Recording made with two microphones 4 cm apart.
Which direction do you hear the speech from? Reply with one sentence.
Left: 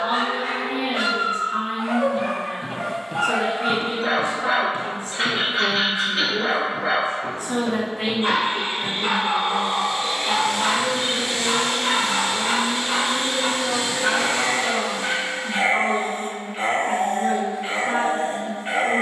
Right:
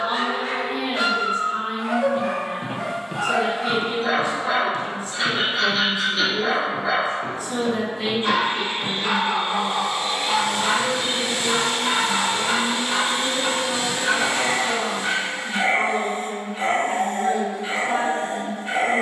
In this clip you hear the speech on the left.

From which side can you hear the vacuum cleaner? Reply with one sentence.
In this clip you hear the vacuum cleaner on the right.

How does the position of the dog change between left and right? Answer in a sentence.
You can hear the dog stay in one place.